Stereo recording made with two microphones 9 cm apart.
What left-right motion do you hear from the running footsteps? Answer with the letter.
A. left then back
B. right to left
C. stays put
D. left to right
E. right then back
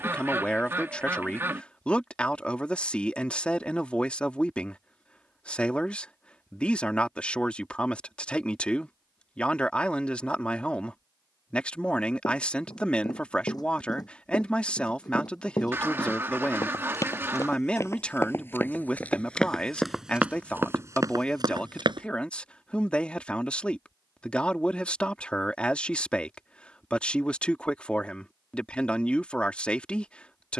D.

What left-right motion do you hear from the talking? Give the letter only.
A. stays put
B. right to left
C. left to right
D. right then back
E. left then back
A.